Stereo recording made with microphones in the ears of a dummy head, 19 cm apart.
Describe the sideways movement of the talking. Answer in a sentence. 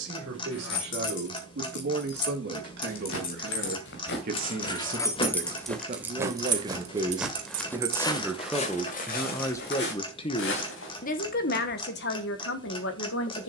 In this clip you hear the talking move from right to left.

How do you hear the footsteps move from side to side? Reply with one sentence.
In this clip you hear the footsteps move from left to right and back again.